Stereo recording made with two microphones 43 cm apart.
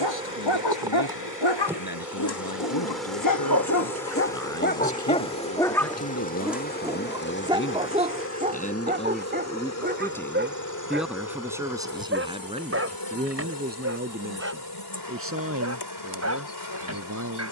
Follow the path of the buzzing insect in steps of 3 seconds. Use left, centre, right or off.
centre, centre, left, left, left, left.